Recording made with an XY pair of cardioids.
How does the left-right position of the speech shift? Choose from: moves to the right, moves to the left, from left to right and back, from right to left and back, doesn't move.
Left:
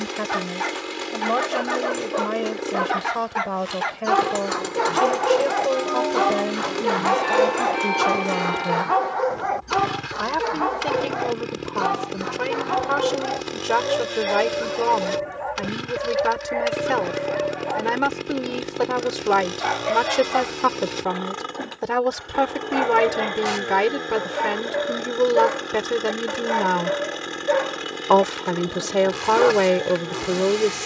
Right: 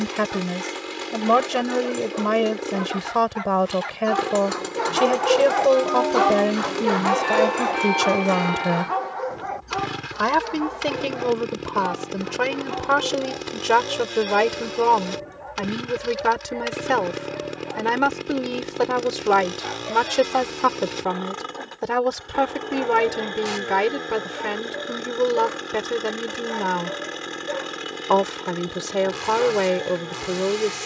moves to the left.